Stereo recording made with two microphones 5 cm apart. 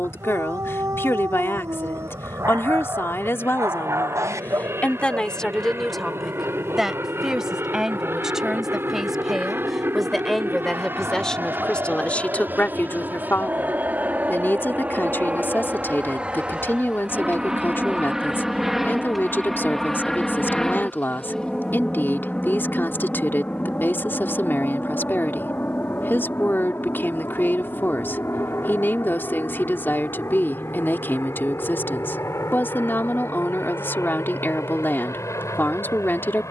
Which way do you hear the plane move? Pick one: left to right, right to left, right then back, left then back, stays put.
right to left.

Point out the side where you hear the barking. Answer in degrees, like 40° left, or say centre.
70° right.